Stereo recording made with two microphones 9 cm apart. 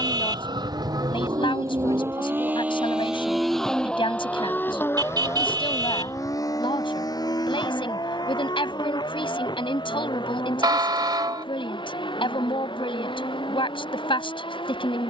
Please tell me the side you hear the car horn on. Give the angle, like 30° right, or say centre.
50° right.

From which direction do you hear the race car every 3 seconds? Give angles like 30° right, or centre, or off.
40° right, 20° left, 40° left, 60° left, 60° left.